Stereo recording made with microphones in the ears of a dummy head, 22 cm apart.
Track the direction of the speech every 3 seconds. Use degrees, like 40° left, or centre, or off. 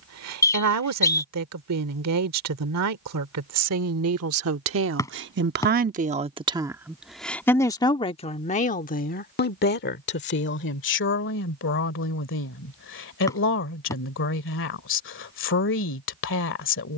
70° right, 60° right, 10° left, 50° left, 50° left, 50° left.